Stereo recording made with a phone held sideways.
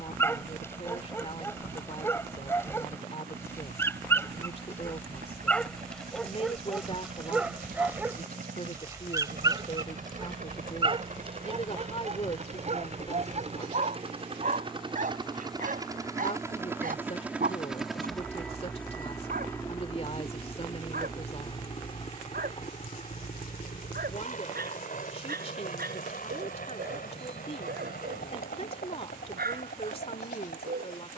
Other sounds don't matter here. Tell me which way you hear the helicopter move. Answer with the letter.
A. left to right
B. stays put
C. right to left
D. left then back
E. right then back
C.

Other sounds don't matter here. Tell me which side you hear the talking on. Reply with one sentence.
In this clip you hear the talking on the left.